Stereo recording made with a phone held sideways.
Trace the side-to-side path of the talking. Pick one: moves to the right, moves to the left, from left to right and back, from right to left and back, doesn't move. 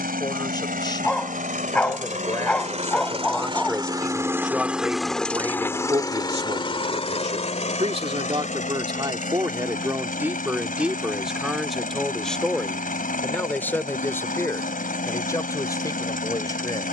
from left to right and back.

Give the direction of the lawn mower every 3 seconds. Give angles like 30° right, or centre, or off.
60° right, 10° right, 40° left, 60° left, 60° left, 60° left.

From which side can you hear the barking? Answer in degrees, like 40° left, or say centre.
10° left.